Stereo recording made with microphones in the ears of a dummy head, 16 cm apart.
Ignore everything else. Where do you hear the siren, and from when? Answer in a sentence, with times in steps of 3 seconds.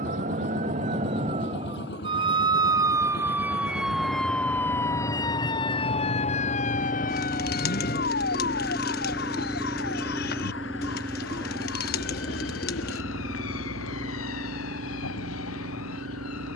In this clip you hear the siren on the right from 0 s, in the centre from 3 s and on the left from 6 s.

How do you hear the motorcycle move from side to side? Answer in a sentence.
You can hear the motorcycle move from left to right.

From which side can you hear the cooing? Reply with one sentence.
In this clip you hear the cooing on the left.